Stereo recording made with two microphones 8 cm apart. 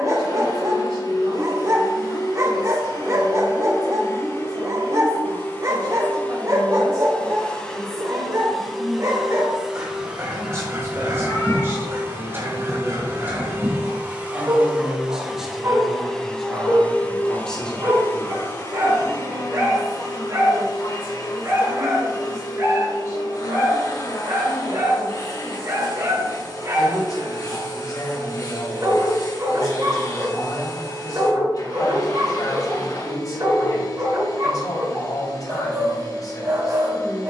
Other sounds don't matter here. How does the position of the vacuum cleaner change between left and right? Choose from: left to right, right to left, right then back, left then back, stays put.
right then back.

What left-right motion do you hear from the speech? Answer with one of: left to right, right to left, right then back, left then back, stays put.
right to left.